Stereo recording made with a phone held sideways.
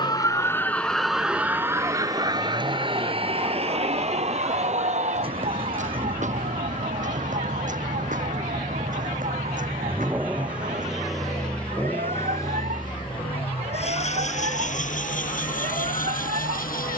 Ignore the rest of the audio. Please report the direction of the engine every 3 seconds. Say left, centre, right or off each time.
right, right, right, centre, left, left.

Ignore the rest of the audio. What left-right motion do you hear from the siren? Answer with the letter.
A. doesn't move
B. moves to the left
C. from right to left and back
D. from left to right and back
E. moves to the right
E.